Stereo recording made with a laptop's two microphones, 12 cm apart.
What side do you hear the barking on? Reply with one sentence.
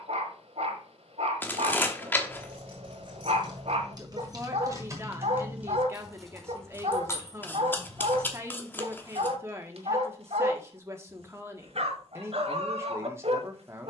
You can hear the barking on the right.